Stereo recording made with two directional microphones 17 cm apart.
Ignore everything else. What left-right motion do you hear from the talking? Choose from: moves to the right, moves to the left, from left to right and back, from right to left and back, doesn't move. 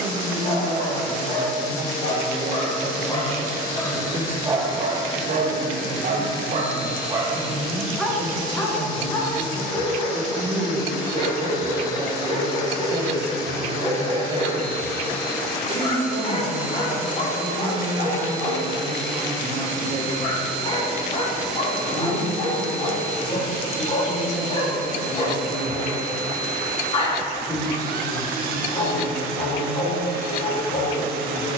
moves to the left.